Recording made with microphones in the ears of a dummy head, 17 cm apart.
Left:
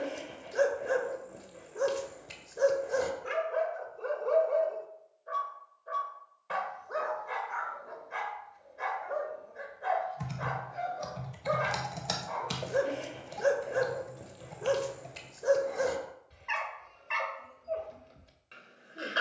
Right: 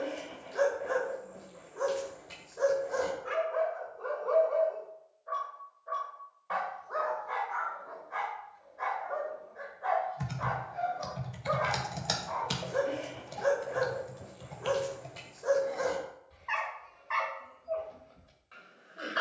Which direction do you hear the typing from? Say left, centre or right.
centre.